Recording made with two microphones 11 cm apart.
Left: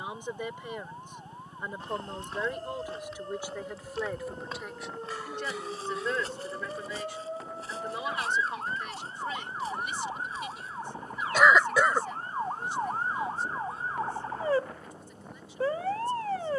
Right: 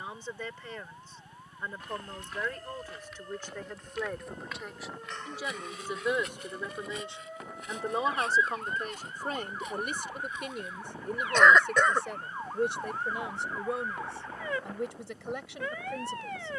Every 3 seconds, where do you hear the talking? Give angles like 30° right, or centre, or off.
20° left, centre, 30° right, 60° right, 80° right, 80° right.